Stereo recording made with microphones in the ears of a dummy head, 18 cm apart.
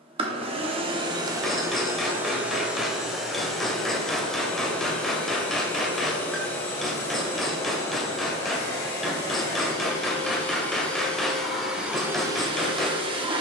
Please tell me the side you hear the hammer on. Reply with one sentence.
You can hear the hammer in the centre.